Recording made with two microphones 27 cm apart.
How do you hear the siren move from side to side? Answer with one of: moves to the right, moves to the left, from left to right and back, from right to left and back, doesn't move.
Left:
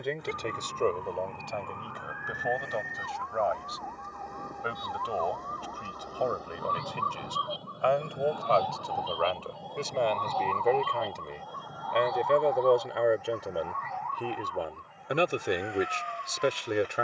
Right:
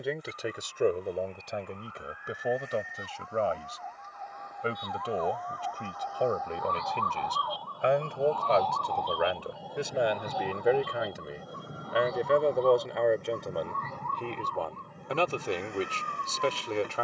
moves to the right.